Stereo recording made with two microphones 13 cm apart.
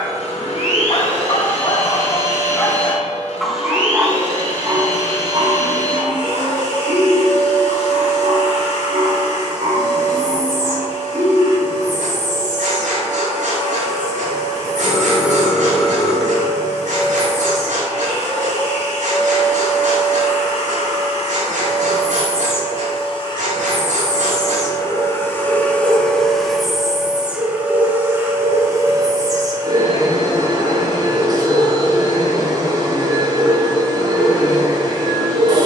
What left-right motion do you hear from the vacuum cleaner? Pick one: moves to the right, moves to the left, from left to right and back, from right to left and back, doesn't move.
moves to the right.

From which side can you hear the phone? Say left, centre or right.
centre.